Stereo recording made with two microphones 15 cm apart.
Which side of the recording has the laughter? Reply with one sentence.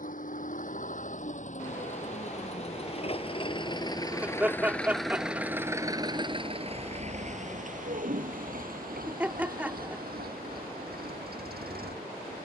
You can hear the laughter in the centre.